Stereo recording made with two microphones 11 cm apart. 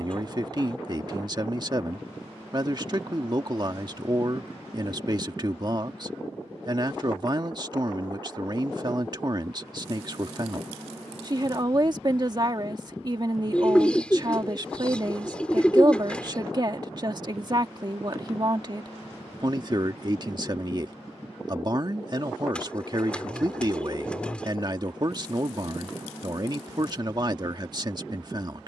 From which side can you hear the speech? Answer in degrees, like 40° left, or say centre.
40° right.